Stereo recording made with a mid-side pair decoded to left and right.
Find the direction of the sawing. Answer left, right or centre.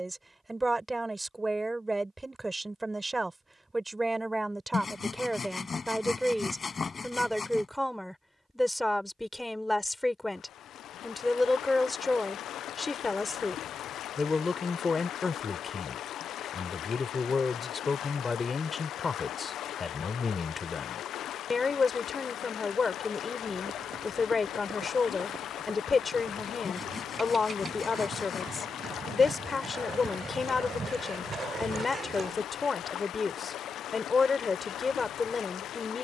left.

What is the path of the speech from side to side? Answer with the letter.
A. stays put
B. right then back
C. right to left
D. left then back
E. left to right
C.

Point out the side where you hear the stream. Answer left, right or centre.
left.